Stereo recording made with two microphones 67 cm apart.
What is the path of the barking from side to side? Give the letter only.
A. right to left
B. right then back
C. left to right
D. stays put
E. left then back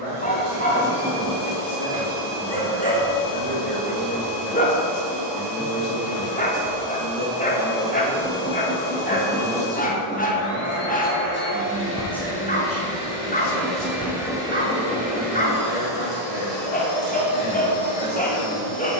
D.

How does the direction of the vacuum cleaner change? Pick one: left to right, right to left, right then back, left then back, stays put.
left then back.